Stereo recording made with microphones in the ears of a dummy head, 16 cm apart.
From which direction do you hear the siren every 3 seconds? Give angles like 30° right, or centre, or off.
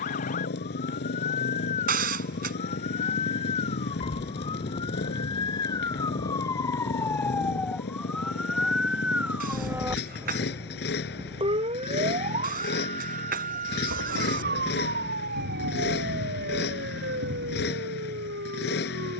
40° left, 30° left, 10° left, 20° right, 50° right, 60° right, 70° right.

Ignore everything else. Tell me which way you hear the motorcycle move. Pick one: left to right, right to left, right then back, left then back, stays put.
stays put.